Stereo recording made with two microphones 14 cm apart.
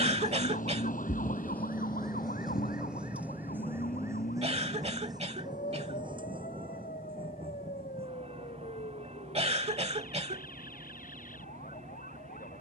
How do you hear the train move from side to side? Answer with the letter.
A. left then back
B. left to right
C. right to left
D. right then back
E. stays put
B.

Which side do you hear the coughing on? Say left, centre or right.
right.